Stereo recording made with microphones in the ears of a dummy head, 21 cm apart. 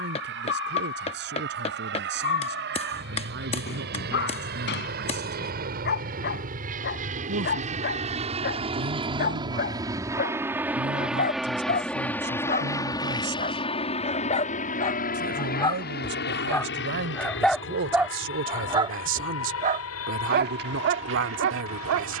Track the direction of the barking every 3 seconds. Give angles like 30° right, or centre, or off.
50° left, 50° left, 50° left, 40° left, 30° left, 10° left, 30° right, 60° right.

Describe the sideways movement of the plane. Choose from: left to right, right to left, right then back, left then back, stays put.
right to left.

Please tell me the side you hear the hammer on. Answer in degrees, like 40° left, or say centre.
30° left.